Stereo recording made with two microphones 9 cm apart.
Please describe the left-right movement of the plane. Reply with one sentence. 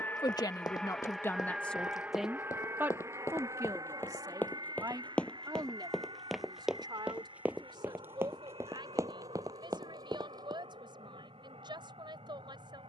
You can hear the plane move to the right.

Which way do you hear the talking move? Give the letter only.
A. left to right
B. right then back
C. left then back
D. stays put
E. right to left
A.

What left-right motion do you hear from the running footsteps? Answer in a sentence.
You can hear the running footsteps go from the left side to the right.